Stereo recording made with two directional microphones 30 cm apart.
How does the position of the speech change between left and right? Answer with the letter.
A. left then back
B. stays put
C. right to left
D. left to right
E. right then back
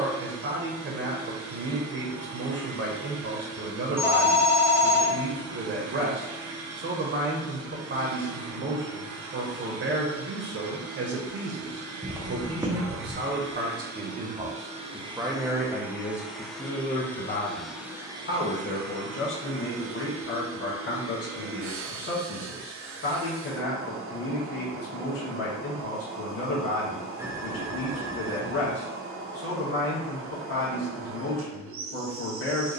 C.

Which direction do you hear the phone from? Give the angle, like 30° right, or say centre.
10° right.